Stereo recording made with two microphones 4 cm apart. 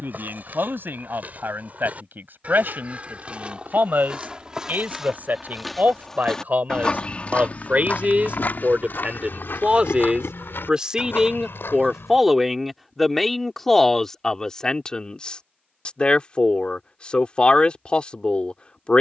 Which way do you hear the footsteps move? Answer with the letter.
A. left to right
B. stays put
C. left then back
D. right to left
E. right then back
D.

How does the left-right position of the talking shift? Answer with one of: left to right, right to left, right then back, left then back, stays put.
right to left.